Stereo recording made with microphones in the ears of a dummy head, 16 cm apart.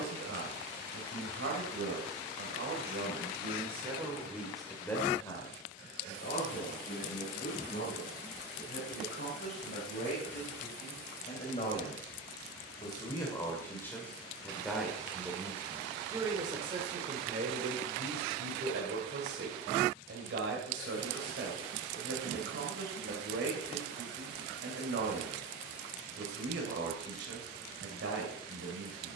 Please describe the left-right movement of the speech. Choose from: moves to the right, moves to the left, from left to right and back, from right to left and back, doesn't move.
from right to left and back.